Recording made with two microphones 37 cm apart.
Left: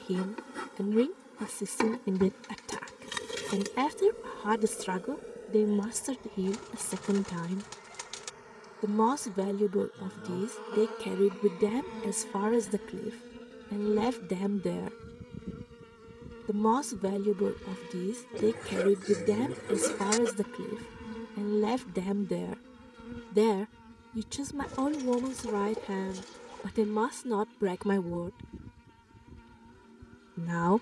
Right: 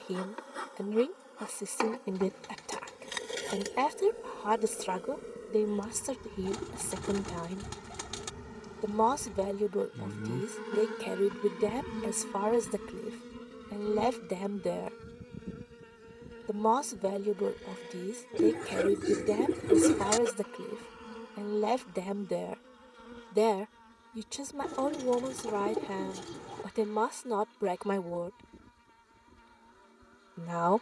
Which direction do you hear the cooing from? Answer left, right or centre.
right.